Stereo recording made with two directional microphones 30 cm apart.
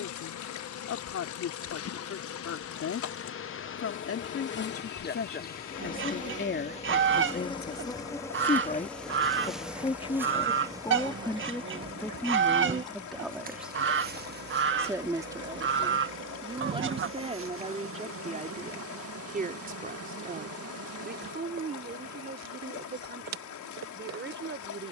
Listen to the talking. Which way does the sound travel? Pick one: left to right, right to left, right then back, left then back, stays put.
left to right.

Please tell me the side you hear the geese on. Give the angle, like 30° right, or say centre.
40° right.